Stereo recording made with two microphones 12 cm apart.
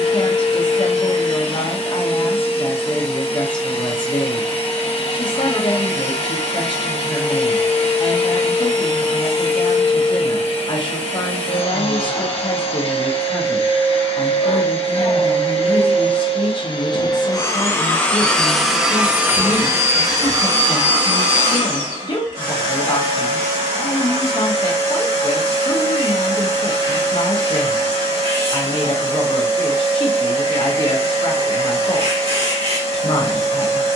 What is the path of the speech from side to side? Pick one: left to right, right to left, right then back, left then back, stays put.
stays put.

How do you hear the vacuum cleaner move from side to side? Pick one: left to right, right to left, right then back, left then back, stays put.
left to right.